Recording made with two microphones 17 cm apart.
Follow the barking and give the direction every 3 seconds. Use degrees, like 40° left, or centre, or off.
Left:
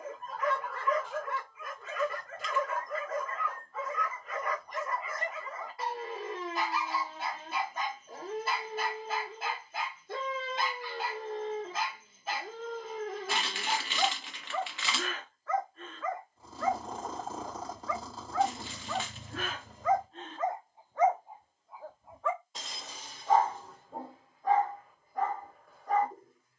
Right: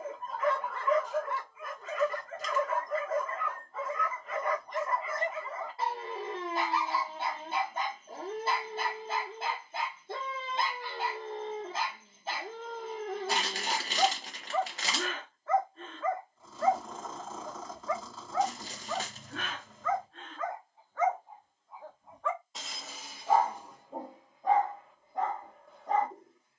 30° right, 30° right, 30° right, 30° right, 30° right, 30° right, 10° left, centre, 20° right.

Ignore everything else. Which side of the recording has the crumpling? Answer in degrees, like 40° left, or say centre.
40° right.